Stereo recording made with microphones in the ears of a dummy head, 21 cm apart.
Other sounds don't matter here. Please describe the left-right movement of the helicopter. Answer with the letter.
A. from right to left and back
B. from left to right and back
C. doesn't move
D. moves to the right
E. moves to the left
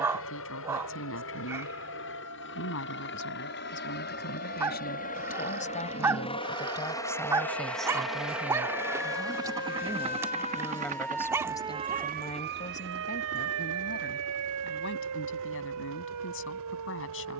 D.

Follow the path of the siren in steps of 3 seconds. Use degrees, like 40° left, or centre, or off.
80° left, 80° left, 60° left, 20° left, 60° right, 80° right.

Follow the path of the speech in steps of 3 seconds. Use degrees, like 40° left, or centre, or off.
60° left, 50° left, 10° left, centre, 40° left, 60° left.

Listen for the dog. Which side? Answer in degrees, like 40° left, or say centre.
10° right.